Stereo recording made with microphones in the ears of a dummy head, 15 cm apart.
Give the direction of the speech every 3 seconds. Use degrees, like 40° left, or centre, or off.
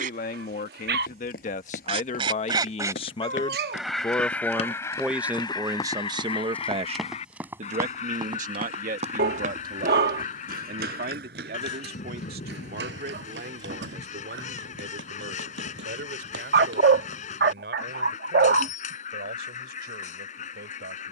50° left, centre, 50° right, 70° right, 70° right, 80° right, 80° right.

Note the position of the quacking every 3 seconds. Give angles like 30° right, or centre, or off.
40° right, 20° left, 50° left, 50° left, 50° left, 50° left, 50° left.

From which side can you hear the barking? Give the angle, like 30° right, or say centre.
70° right.